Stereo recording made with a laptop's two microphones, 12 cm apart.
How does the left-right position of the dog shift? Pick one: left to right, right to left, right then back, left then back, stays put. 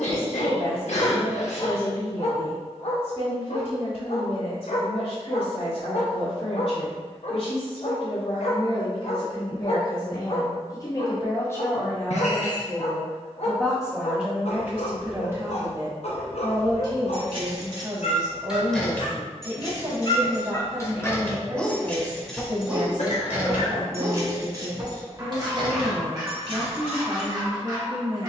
left to right.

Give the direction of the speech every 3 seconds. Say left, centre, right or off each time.
left, left, left, left, centre, right, right, right, right, right.